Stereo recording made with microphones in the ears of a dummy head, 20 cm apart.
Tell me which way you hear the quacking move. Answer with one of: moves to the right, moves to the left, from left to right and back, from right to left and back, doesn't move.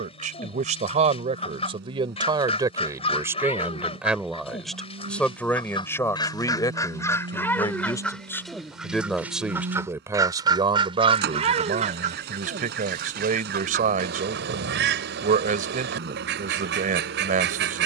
moves to the right.